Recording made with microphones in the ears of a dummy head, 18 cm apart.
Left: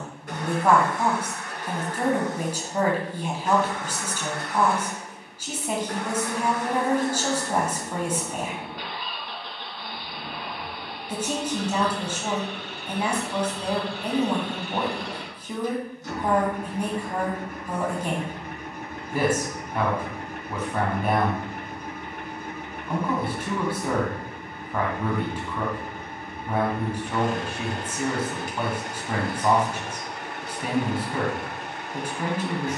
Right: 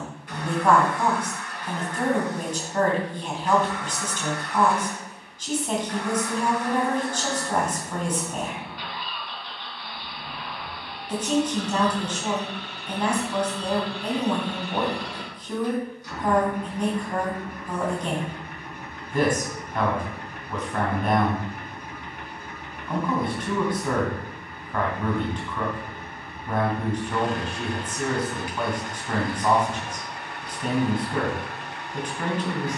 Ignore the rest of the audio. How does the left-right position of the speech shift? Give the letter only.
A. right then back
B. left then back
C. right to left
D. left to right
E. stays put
E.